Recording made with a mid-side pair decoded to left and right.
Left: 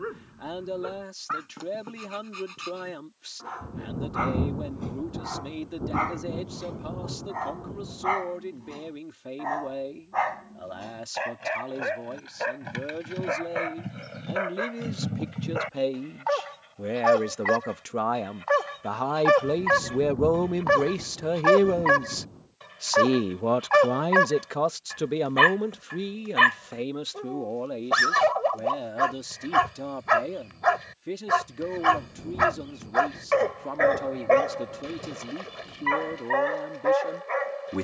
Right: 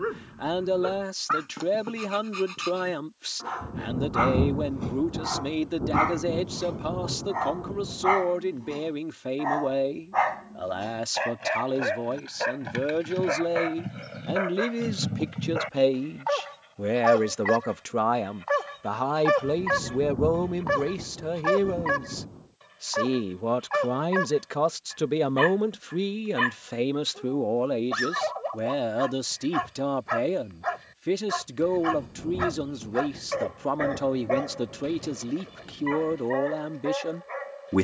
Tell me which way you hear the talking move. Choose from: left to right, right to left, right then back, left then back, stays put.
left then back.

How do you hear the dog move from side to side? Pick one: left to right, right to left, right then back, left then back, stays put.
right to left.